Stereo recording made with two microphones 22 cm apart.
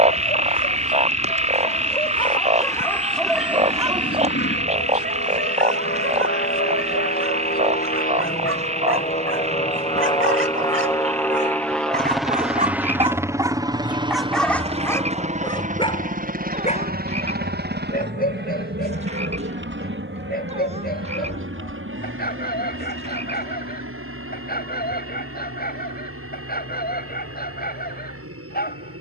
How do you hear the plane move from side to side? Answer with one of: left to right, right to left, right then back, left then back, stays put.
left to right.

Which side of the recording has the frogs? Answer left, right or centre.
right.